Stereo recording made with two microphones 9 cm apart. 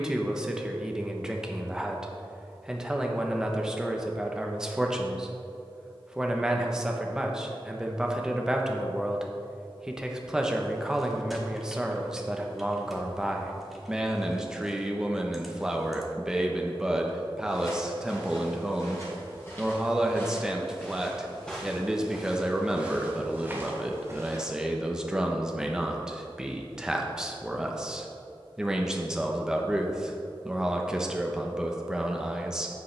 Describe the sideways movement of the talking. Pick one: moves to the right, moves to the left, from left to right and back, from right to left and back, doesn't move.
doesn't move.